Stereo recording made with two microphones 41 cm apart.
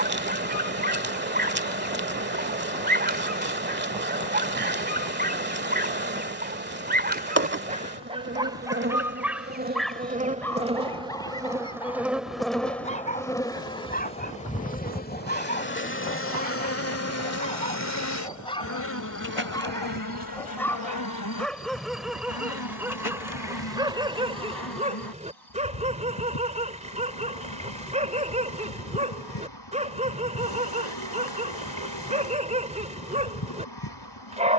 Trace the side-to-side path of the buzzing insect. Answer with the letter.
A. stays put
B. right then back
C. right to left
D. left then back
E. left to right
C.